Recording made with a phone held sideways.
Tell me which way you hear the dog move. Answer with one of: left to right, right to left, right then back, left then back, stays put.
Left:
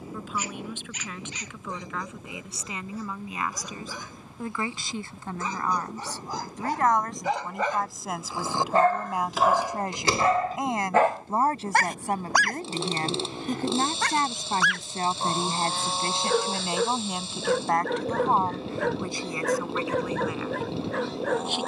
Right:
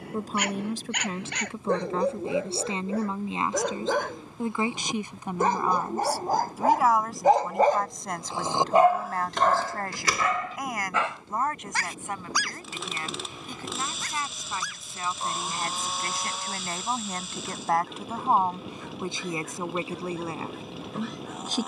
right to left.